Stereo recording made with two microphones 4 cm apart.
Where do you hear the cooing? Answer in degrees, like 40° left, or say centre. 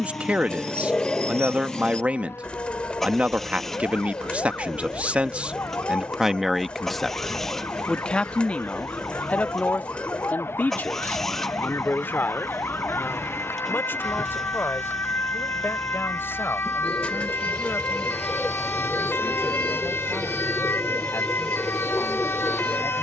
20° left.